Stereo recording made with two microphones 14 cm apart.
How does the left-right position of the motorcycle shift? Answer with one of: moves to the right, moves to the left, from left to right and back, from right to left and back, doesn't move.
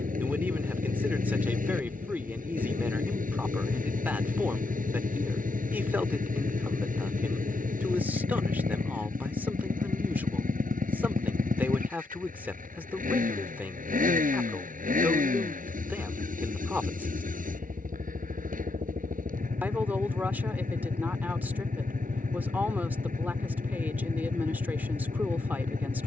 doesn't move.